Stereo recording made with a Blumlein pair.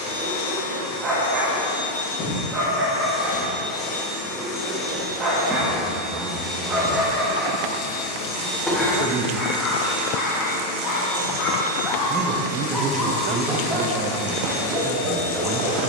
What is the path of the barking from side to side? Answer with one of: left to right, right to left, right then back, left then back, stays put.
left then back.